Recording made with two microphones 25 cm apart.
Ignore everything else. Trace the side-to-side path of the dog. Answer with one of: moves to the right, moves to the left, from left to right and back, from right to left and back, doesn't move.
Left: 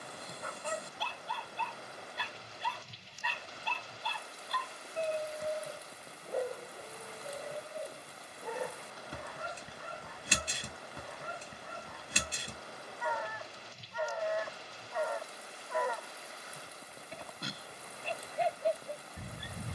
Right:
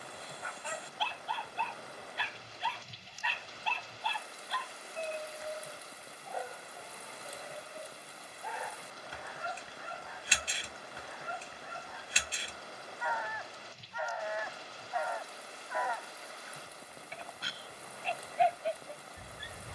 doesn't move.